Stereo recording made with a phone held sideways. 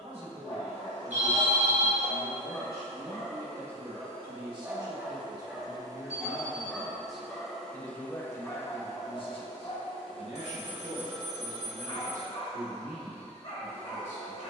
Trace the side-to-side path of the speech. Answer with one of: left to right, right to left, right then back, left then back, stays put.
right to left.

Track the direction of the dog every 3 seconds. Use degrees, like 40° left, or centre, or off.
40° left, centre, 20° left, 40° left, 60° left.